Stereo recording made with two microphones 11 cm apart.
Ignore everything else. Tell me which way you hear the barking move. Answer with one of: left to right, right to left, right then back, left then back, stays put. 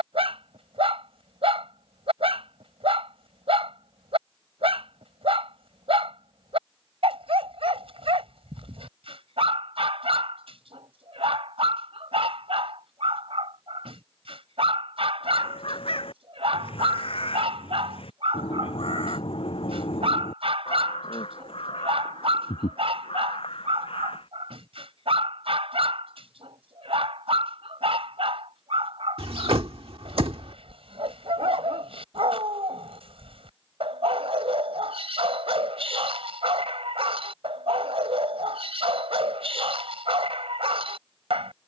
stays put.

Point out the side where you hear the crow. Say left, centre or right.
left.